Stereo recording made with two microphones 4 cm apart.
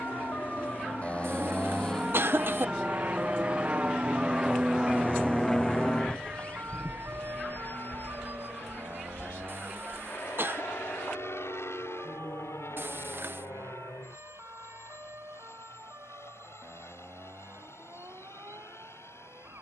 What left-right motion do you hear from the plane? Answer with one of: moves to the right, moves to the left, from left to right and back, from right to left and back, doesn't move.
moves to the left.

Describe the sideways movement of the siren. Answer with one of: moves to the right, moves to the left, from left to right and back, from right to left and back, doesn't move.
moves to the right.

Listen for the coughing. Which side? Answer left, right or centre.
right.